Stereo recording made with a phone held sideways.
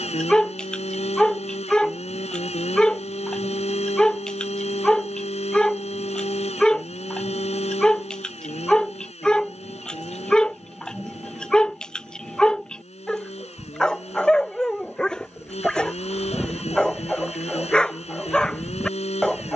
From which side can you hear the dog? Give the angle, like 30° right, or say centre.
10° left.